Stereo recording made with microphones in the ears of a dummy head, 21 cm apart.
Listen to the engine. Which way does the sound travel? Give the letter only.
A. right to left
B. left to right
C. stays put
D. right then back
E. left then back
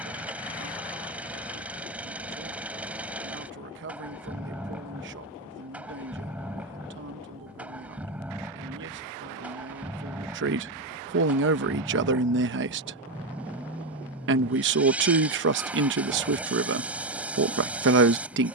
C.